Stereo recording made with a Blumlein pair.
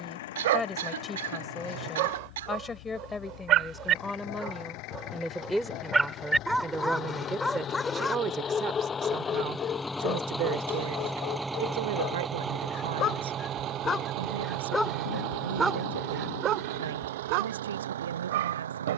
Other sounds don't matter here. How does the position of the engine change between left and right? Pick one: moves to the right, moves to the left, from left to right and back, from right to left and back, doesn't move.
moves to the right.